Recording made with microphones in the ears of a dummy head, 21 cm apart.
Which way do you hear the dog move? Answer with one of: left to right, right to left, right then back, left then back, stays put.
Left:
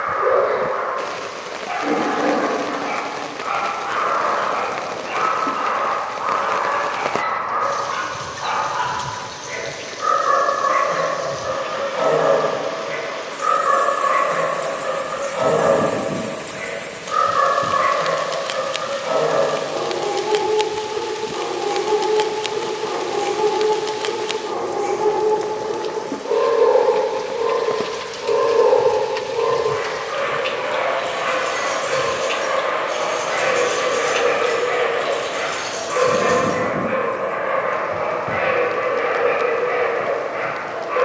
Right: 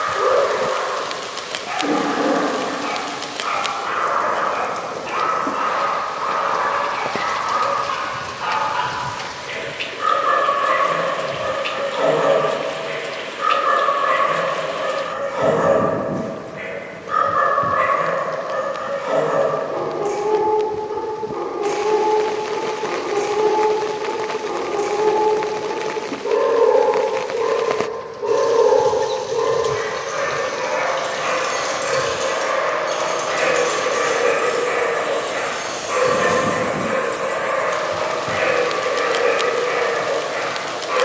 stays put.